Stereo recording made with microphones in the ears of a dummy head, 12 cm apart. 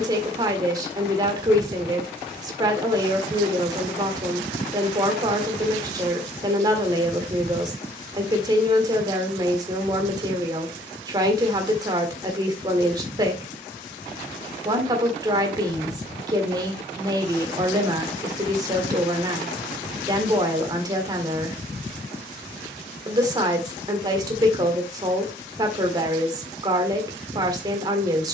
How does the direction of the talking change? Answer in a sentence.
You can hear the talking stay in one place.